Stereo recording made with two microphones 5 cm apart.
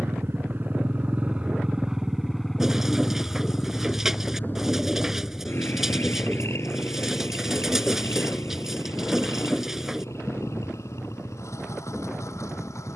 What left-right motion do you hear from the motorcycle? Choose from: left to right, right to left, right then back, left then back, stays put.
right to left.